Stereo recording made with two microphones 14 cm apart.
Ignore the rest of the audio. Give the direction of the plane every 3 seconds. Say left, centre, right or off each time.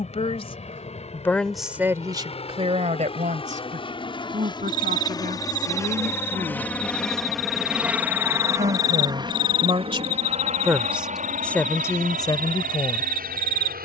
left, left, centre, right, right.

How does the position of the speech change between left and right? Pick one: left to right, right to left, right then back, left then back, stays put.
right then back.